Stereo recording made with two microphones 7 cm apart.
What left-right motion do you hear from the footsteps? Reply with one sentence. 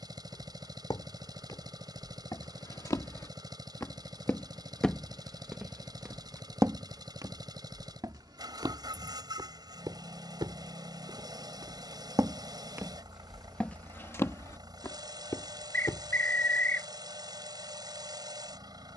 In this clip you hear the footsteps go right and come back.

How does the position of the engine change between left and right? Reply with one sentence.
You can hear the engine stay in one place.